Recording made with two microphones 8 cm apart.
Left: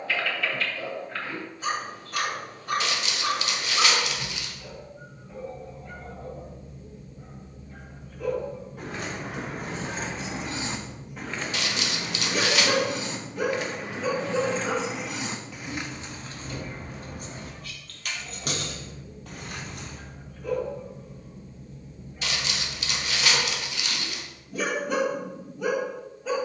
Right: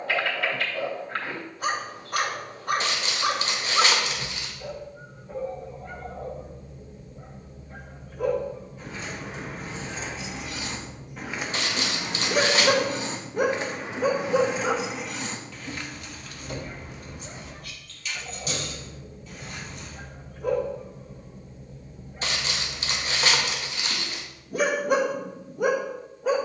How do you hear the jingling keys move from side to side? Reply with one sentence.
In this clip you hear the jingling keys move from left to right and back again.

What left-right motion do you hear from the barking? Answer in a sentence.
You can hear the barking stay put.